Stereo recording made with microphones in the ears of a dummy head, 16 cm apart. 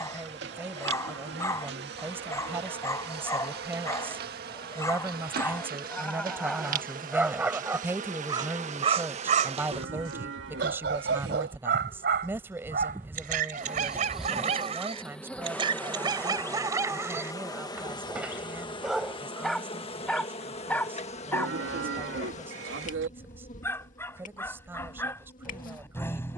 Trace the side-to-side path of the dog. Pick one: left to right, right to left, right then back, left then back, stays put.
right then back.